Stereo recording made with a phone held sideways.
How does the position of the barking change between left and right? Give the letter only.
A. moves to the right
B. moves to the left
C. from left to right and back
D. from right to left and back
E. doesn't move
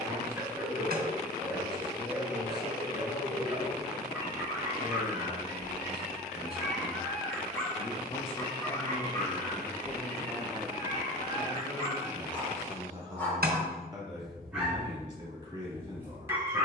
D.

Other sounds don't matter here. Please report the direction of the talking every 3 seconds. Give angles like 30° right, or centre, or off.
80° left, 80° left, 50° left, centre, 20° right, 30° right.